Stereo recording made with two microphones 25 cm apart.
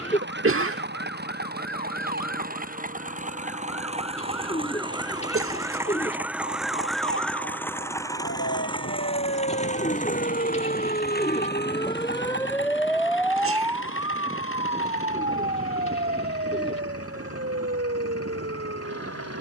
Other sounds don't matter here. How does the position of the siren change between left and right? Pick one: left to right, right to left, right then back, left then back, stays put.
left to right.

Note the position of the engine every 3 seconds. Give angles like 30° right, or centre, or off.
40° right, 20° right, 10° left, 30° left, 50° left, 60° left, 70° left.